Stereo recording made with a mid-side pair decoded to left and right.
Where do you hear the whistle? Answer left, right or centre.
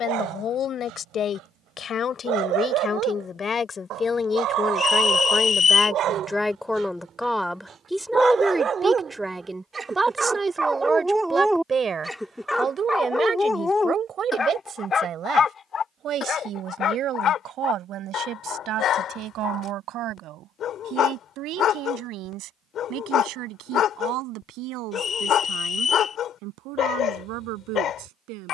left.